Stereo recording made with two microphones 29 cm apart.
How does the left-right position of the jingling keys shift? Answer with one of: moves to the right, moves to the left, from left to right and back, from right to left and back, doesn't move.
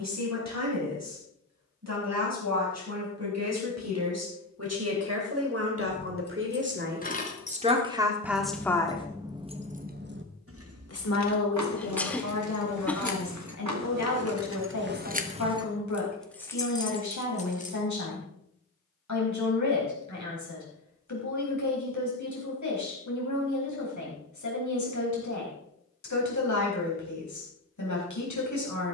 from left to right and back.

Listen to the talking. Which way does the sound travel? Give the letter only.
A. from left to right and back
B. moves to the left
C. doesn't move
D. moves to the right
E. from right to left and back
B.